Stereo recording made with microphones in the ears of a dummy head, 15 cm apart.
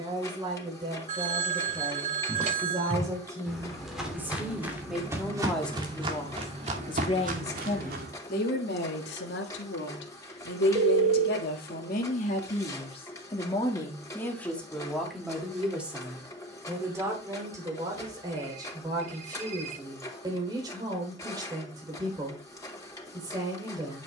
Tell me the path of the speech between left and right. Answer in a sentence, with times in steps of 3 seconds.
You can hear the speech on the right from 0 s, in the centre from 3 s, on the left from 6 s, in the centre from 15 s and on the right from 18 s.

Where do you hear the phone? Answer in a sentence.
In this clip you hear the phone on the right.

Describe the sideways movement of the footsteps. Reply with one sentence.
In this clip you hear the footsteps travel towards the right.